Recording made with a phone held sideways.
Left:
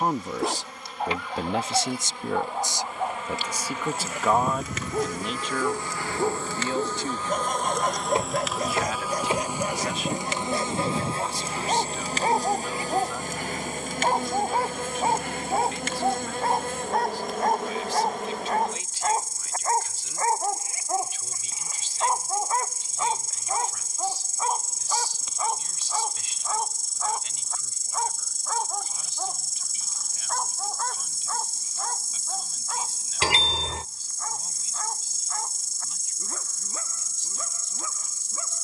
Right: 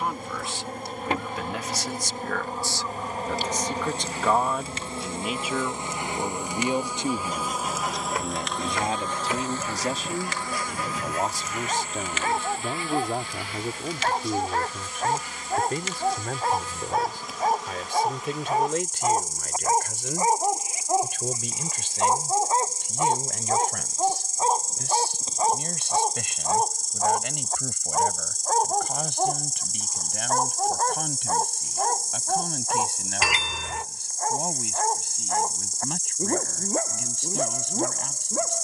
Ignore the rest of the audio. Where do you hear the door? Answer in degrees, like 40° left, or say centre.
30° left.